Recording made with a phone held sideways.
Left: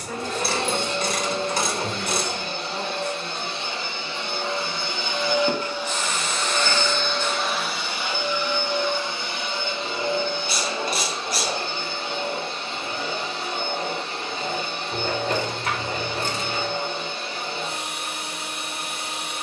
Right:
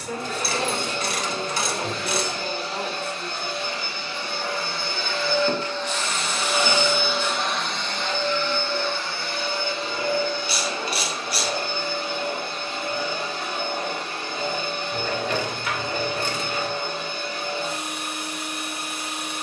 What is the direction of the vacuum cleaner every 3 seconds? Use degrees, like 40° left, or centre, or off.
30° left, 20° left, centre, 20° left, 30° left, 30° left, 30° left.